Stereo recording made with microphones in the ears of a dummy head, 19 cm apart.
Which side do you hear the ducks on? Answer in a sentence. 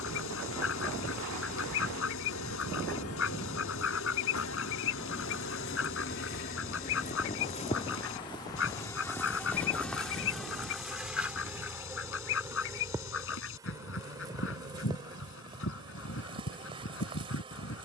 In this clip you hear the ducks on the left.